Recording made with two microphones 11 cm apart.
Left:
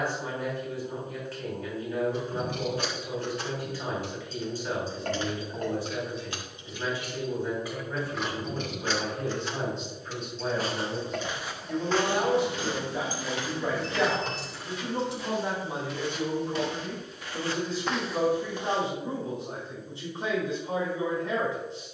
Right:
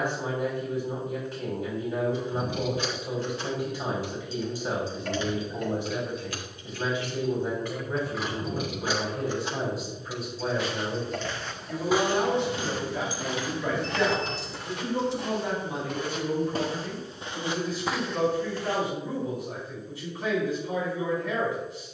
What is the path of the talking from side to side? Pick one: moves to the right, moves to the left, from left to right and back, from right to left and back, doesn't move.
moves to the left.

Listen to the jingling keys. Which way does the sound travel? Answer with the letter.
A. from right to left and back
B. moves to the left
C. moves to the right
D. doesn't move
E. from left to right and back
E.